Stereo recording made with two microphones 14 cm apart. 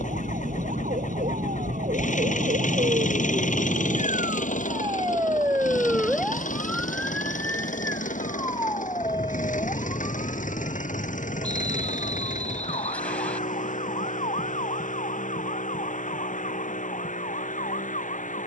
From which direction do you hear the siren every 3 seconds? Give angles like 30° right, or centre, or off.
70° right, 30° right, 10° left, 40° left, 50° left, 50° left.